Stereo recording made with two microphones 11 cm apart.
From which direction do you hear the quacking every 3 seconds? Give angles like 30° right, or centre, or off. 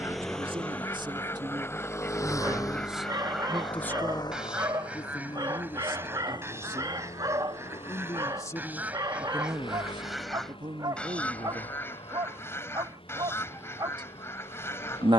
20° left, 10° right, 20° right, centre, 20° left.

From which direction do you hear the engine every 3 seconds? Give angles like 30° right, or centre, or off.
20° left, 40° left, 50° left, 50° left, 60° left.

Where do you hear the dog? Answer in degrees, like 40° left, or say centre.
40° right.